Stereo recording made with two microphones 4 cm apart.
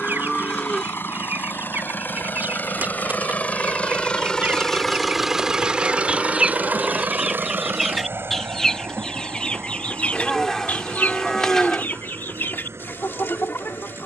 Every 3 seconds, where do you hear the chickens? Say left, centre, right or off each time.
right, right, centre, left, left.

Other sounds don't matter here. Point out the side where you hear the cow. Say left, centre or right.
centre.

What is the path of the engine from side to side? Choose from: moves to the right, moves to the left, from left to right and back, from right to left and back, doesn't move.
moves to the right.